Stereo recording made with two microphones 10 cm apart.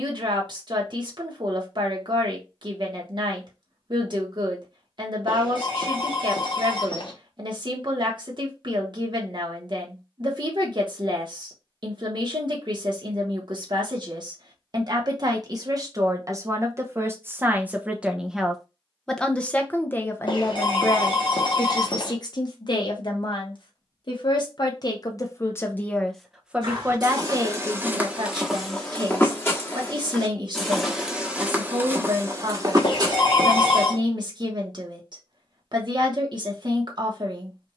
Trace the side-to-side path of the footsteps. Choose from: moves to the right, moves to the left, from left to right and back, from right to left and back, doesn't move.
from right to left and back.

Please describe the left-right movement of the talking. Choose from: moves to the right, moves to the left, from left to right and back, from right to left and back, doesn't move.
from right to left and back.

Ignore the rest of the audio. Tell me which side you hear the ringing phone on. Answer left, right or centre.
left.